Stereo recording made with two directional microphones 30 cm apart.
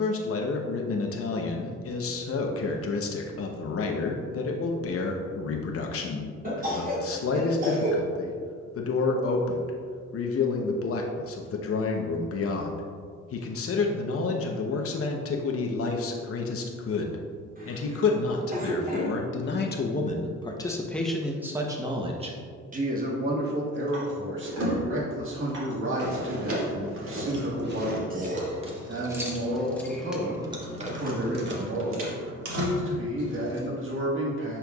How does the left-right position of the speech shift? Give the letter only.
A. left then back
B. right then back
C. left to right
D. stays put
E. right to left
C.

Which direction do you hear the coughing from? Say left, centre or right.
right.